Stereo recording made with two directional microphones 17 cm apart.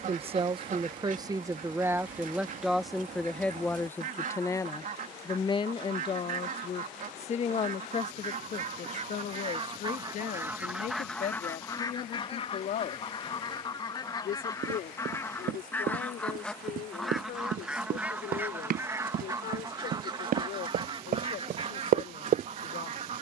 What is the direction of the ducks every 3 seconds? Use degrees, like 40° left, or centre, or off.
50° right, 50° right, 50° right, 10° right, 30° left, centre, 20° right, 40° right.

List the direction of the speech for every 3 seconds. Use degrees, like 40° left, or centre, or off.
20° right, 20° left, 40° left, 50° left, 60° left, 60° left, 60° left, 60° left.